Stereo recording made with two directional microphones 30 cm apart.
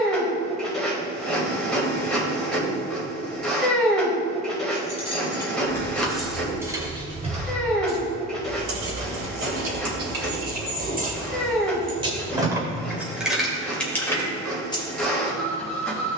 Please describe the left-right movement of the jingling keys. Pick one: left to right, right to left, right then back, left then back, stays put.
right then back.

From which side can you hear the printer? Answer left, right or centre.
centre.